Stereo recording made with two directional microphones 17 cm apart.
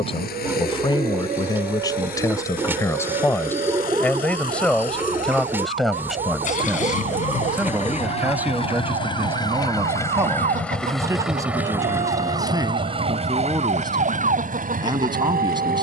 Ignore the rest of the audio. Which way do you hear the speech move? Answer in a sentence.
You can hear the speech travel towards the right.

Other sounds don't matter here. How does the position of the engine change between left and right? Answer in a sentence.
You can hear the engine go from the left side to the right.